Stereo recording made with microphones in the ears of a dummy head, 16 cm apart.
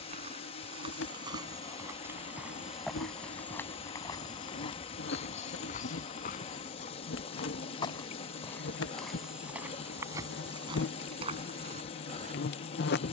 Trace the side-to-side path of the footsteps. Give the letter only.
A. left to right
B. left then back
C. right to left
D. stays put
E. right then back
B.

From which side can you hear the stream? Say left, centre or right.
left.